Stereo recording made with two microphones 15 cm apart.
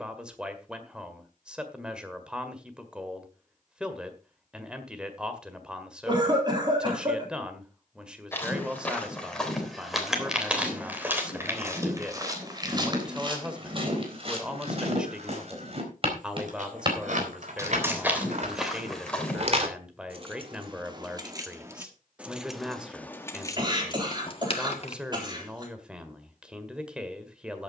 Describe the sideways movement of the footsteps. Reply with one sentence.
You can hear the footsteps go right and come back.